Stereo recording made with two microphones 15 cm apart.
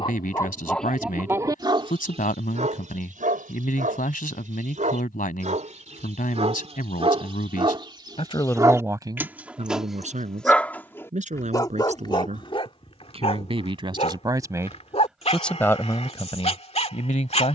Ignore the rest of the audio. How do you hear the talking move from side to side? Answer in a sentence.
You can hear the talking go right and come back.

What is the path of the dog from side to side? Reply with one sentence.
You can hear the dog move from left to right and back again.